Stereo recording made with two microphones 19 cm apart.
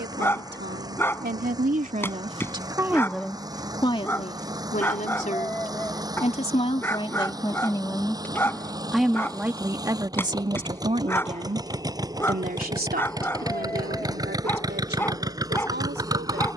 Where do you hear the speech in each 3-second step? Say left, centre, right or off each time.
right, left, left, right, right, right.